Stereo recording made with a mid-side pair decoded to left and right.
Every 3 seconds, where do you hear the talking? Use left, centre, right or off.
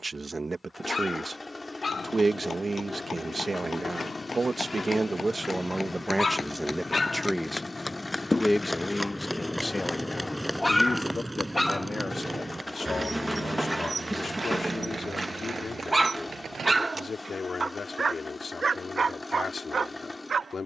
right, right, centre, left, left, left, left.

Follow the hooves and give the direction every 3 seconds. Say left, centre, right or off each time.
left, left, left, centre, right, right, off.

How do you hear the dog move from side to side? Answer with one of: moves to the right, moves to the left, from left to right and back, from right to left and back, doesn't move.
moves to the right.